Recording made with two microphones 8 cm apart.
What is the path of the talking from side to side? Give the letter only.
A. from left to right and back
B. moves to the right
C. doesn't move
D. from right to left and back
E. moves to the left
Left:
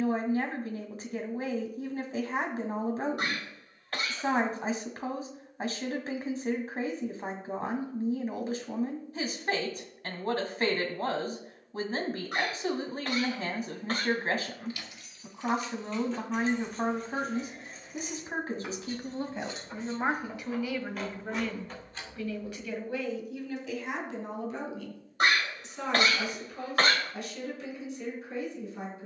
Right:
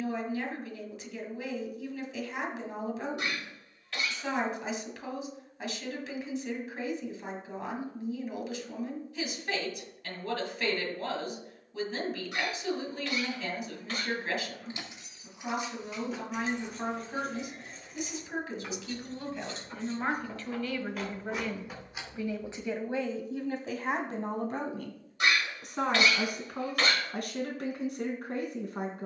B.